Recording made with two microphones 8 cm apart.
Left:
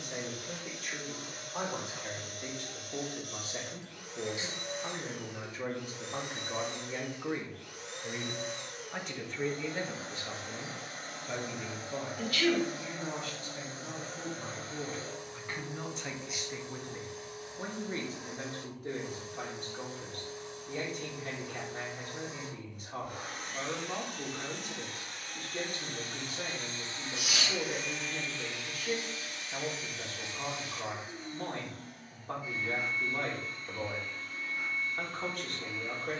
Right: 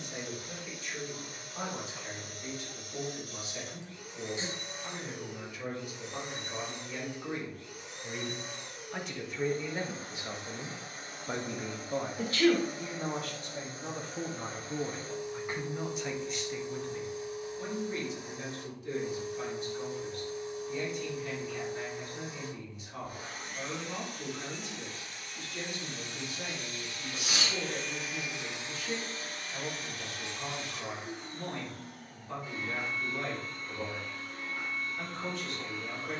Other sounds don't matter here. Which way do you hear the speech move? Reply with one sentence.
In this clip you hear the speech go right and come back.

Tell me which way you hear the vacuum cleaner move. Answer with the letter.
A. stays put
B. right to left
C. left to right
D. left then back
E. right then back
C.